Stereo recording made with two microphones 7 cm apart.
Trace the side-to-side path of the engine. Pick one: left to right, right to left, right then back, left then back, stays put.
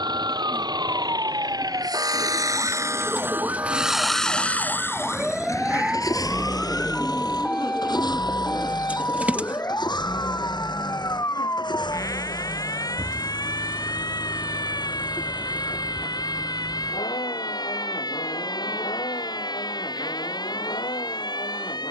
right to left.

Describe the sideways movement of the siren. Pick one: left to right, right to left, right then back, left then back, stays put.
right to left.